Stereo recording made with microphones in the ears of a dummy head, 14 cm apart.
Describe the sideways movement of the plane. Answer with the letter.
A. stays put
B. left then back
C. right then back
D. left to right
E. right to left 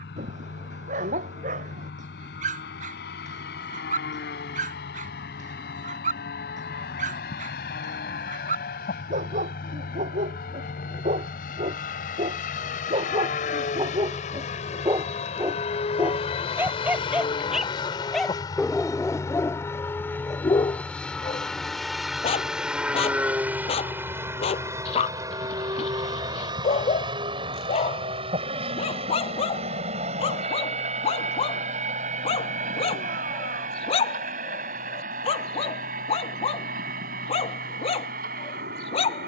D.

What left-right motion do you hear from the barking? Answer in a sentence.
In this clip you hear the barking go from the right side to the left.